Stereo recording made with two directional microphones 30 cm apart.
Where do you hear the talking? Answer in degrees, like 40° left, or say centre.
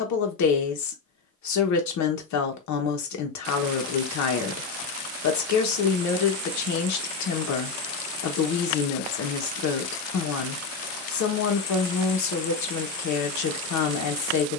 60° left.